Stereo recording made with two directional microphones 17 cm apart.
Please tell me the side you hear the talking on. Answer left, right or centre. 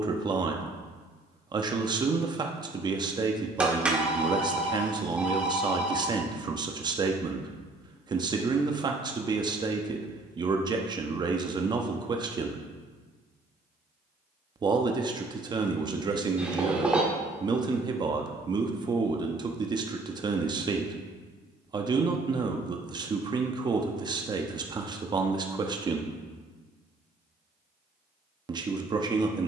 right.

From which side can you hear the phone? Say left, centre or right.
centre.